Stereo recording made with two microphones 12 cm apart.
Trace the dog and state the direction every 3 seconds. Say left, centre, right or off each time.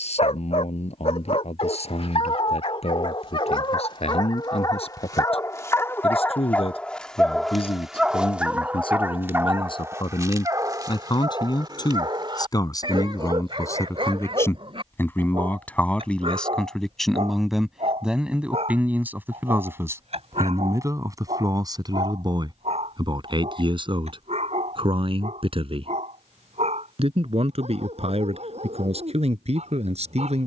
left, left, centre, right, right, right, right, right, right, right.